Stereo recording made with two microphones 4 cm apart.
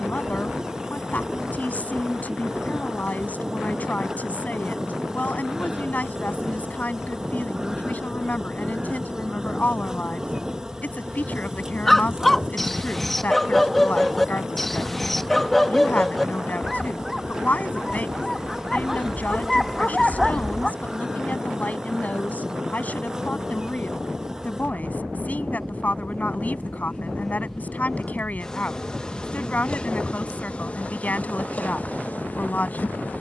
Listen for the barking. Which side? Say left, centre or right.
centre.